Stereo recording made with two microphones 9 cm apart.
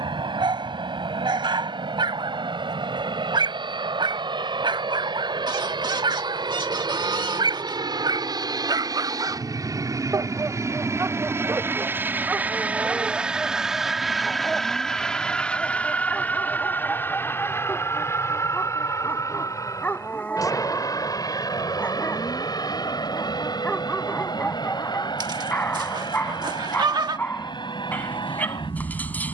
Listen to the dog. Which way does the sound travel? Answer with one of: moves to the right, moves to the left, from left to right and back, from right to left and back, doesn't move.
moves to the left.